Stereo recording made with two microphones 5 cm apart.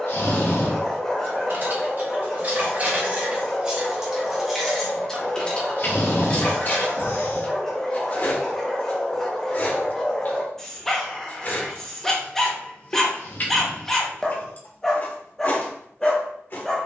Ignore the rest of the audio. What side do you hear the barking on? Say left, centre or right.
centre.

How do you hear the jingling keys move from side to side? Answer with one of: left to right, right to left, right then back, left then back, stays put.
right to left.